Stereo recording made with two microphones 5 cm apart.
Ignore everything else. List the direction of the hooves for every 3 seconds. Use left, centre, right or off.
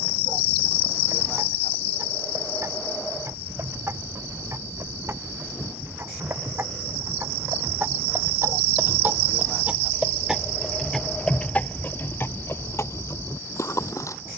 right, right, right, centre, left.